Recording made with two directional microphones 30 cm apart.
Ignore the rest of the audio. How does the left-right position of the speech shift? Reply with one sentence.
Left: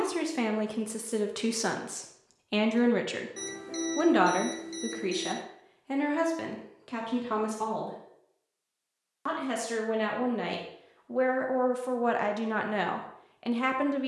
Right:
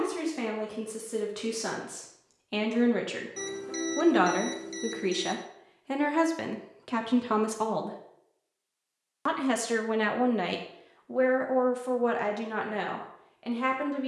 You can hear the speech go right and come back.